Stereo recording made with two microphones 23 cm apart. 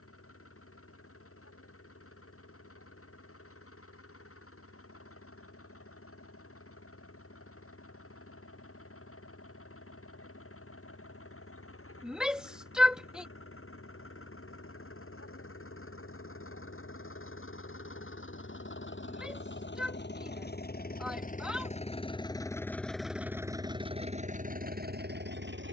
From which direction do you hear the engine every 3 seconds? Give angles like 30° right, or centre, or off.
80° left, 80° left, 80° left, 80° left, 70° left, 70° left, 50° left, 10° left, 40° right.